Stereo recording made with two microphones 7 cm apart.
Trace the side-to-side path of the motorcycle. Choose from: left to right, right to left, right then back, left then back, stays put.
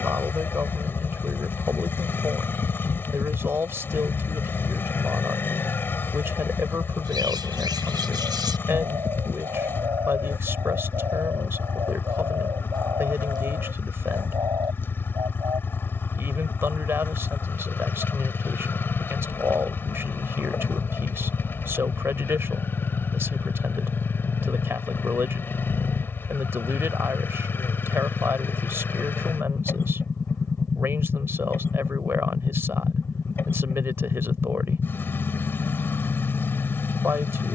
stays put.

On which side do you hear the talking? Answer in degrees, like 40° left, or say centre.
30° right.